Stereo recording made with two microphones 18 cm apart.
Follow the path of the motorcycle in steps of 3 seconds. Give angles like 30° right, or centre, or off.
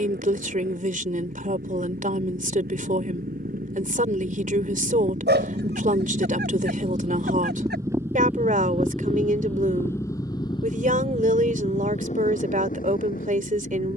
60° right, 50° right, 20° right, 20° left, 50° left.